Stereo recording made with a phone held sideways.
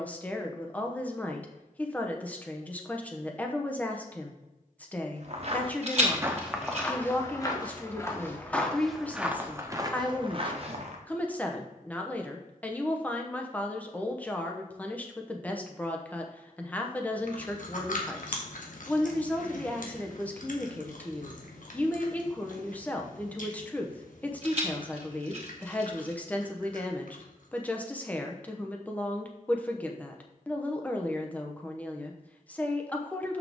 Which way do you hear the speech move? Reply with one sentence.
You can hear the speech stay in one place.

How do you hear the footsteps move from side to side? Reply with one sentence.
You can hear the footsteps go left and come back.